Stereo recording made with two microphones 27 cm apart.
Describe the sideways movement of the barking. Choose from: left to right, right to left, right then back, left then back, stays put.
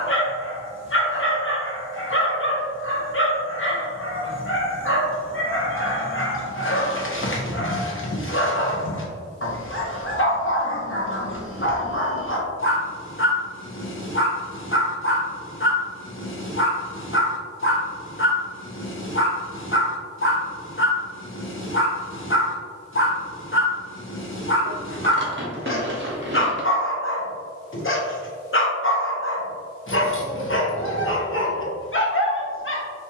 stays put.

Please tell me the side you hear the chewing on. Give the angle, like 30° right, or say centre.
40° right.